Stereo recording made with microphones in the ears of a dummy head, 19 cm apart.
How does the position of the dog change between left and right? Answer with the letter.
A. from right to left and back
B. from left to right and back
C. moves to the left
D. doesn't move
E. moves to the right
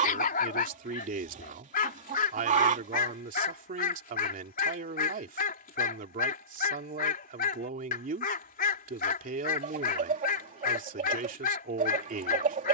D.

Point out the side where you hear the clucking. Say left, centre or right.
right.